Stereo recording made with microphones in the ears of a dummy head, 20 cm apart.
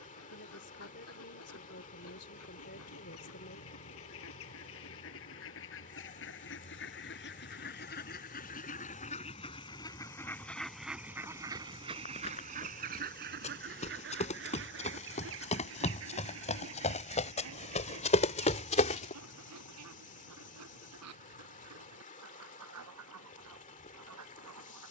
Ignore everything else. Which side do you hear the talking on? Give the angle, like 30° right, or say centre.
50° left.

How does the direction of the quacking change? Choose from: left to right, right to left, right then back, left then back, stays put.
left to right.